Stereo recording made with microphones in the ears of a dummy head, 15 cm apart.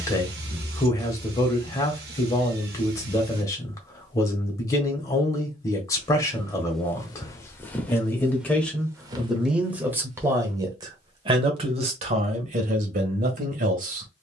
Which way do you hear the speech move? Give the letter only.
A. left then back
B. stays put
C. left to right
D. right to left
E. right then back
C.